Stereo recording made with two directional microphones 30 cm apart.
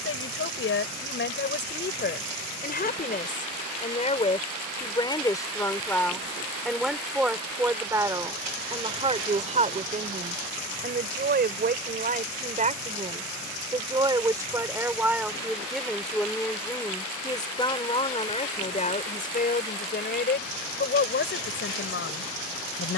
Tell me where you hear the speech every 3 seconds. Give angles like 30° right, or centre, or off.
40° left, 20° left, 10° right, 30° right, 20° right, 10° left, 30° left, 40° left.